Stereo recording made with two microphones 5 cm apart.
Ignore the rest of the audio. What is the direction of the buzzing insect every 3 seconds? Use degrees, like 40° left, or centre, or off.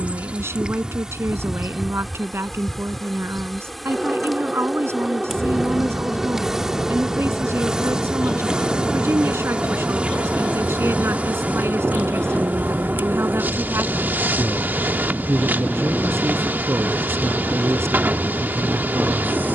10° right, centre, 10° right, 30° right, 40° right, 40° right, 40° right.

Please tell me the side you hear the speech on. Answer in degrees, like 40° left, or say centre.
70° right.